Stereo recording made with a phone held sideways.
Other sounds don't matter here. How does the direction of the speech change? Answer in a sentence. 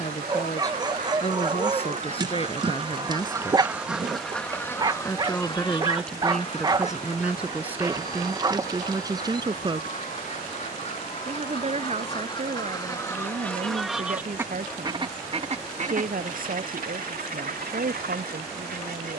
In this clip you hear the speech move to the right.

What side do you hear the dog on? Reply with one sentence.
In this clip you hear the dog on the right.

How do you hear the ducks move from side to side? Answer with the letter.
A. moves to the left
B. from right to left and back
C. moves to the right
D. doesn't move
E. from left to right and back
B.